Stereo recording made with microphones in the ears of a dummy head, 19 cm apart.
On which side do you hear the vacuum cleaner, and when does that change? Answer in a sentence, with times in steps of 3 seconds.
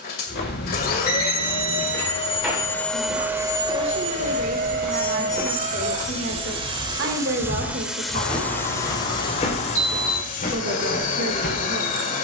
You can hear the vacuum cleaner on the left from 0 s, on the right from 3 s, in the centre from 6 s and on the left from 9 s.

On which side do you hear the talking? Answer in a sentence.
You can hear the talking on the right.